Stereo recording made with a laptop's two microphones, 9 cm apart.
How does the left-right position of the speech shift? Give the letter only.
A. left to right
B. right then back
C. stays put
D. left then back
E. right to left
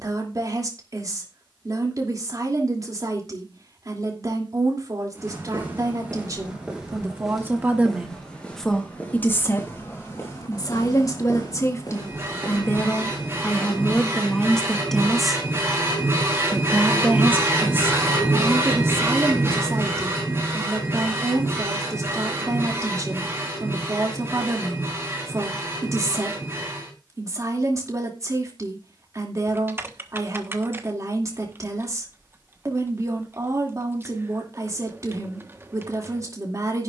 D.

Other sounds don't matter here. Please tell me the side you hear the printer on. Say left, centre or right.
right.